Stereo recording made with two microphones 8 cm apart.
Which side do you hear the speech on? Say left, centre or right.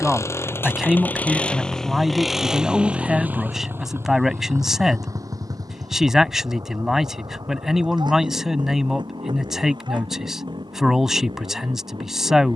centre.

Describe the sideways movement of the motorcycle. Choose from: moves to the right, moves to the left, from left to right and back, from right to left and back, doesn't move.
moves to the right.